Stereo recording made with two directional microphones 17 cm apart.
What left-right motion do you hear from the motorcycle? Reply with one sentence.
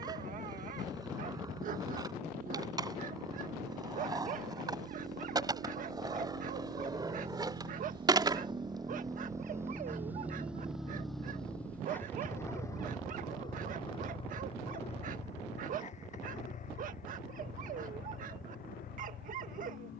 In this clip you hear the motorcycle travel towards the left.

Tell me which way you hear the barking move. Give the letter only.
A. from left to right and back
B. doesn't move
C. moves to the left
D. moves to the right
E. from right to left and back
B.